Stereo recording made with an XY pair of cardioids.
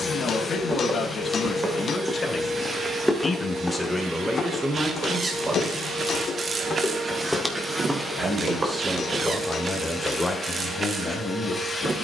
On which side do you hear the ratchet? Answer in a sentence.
In this clip you hear the ratchet on the right.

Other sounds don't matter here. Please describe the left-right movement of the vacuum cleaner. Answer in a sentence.
In this clip you hear the vacuum cleaner go right and come back.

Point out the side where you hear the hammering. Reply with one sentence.
You can hear the hammering on the left.